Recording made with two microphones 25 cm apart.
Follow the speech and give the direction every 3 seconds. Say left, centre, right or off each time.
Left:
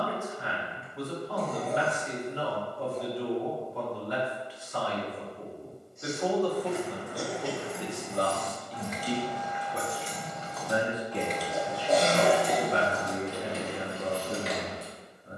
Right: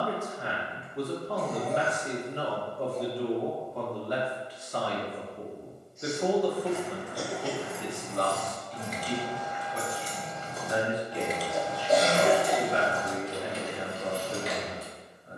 right, right, centre, left, left.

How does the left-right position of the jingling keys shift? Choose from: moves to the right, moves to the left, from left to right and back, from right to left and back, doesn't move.
from left to right and back.